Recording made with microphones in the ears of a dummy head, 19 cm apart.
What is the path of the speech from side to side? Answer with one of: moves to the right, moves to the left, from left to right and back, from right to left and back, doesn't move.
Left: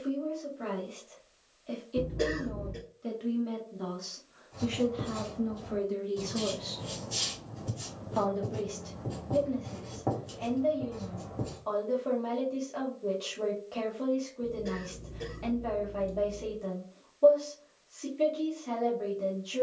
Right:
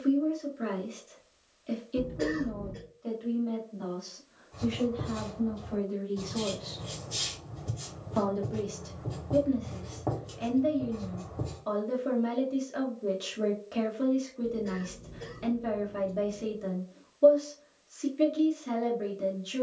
from right to left and back.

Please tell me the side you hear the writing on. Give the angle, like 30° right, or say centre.
centre.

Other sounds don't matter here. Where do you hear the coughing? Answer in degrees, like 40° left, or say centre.
50° left.